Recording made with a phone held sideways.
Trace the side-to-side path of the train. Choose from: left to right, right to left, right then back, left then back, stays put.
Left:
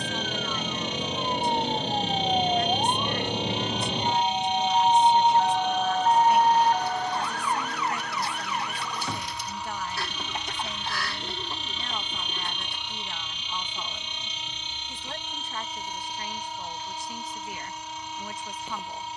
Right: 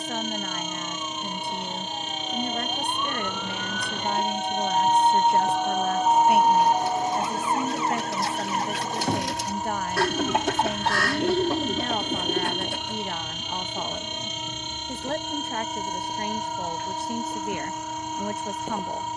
stays put.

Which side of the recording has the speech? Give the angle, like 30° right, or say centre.
60° right.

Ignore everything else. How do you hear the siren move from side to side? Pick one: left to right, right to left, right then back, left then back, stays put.
left to right.